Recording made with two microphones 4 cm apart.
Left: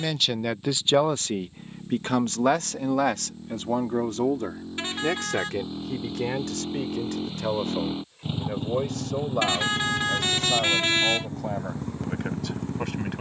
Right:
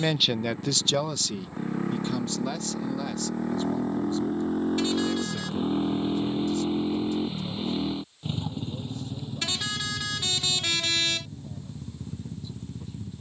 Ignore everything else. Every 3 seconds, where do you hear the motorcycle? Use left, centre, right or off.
right, right, centre, left, left.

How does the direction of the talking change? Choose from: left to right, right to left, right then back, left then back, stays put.
right to left.